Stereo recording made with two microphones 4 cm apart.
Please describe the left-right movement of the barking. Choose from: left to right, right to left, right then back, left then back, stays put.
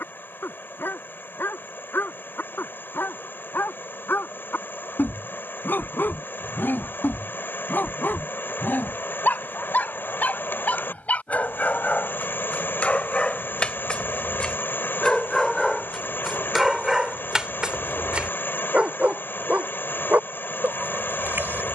left to right.